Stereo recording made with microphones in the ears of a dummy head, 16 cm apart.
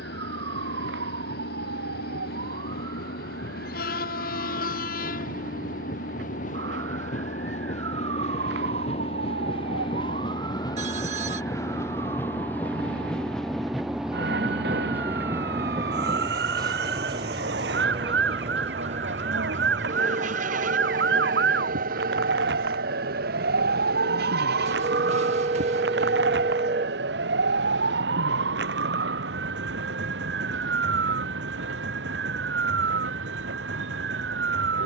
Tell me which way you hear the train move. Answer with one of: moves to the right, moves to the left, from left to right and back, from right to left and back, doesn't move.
moves to the right.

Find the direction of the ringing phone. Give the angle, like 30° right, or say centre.
40° right.